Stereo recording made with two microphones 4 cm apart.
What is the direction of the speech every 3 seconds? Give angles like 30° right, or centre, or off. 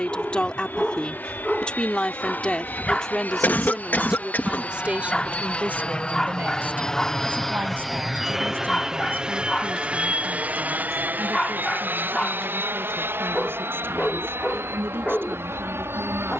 20° left, 20° right, 60° right, 60° right, 70° right, 70° right.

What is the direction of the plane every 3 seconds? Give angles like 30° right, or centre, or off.
60° left, 40° left, 10° left, 30° right, 60° right, 70° right.